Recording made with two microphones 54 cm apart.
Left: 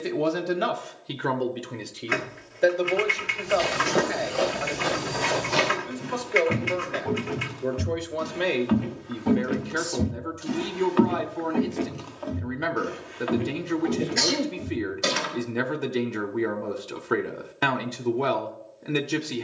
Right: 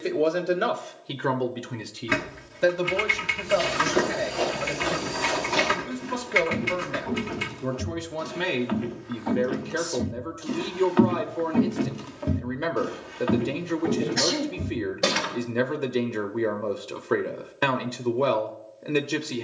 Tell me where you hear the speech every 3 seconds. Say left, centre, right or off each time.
centre, right, right, centre, centre, centre, centre.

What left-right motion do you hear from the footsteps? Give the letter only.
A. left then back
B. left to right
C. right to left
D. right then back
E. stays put
B.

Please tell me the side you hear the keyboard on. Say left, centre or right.
right.